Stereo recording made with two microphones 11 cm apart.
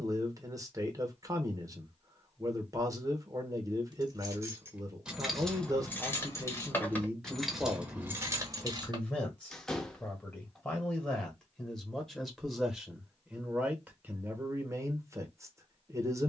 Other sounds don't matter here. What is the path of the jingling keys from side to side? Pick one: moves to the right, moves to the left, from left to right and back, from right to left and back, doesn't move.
from right to left and back.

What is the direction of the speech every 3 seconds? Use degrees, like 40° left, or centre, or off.
30° right, 30° right, 10° right, 10° left, 10° right, 30° right.